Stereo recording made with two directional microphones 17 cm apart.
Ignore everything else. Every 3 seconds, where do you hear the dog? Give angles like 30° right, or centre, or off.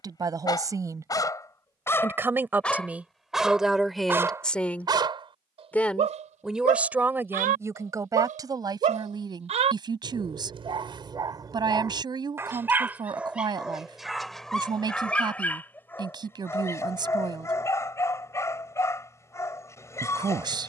20° left, 20° right, 50° right, 30° right, centre, 10° left, 20° left.